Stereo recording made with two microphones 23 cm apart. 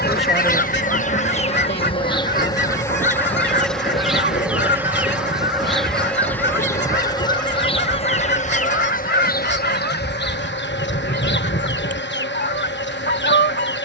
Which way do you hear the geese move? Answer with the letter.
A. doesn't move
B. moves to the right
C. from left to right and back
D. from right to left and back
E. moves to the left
A.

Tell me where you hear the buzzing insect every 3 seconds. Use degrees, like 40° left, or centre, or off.
30° left, centre, 20° left, 50° left, 50° left.